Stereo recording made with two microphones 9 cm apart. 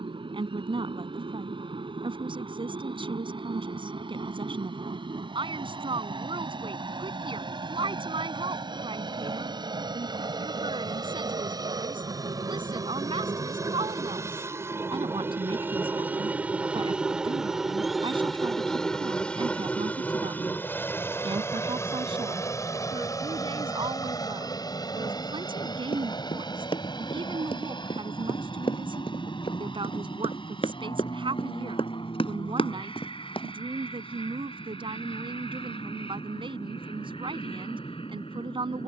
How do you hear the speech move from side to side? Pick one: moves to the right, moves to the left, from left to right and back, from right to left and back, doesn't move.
doesn't move.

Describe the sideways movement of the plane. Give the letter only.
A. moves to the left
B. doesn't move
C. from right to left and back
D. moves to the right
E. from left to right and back
A.